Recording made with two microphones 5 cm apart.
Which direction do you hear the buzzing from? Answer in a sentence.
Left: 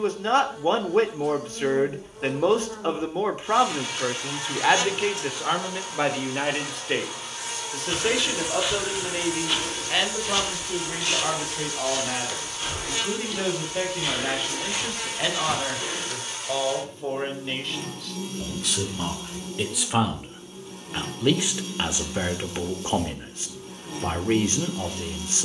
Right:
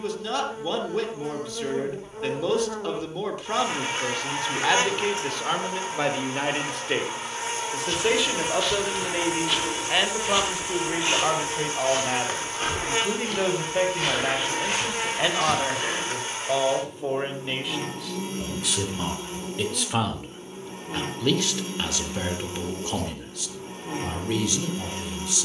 In this clip you hear the buzzing on the right.